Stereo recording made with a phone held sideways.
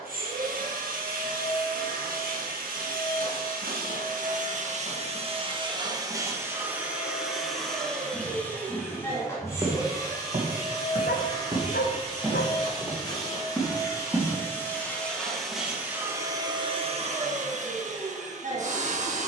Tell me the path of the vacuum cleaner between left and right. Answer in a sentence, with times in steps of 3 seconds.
You can hear the vacuum cleaner on the right from 0 s, in the centre from 6 s, on the left from 9 s and on the right from 15 s.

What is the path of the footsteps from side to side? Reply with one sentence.
In this clip you hear the footsteps go right and come back.